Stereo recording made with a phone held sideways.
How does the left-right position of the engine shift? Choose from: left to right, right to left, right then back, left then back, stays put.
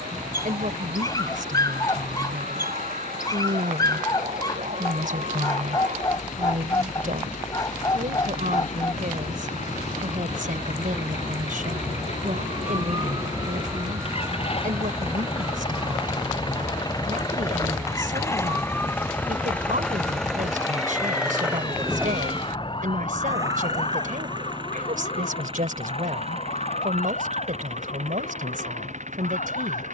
left to right.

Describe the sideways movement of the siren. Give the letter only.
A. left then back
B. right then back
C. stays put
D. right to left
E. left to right
D.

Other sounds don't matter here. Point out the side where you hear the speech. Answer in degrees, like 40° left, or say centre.
70° right.